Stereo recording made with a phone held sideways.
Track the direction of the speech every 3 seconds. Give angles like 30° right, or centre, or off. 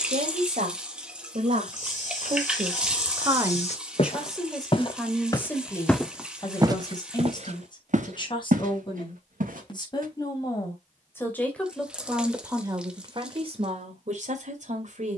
50° right, centre, 30° left, 20° left, 40° right.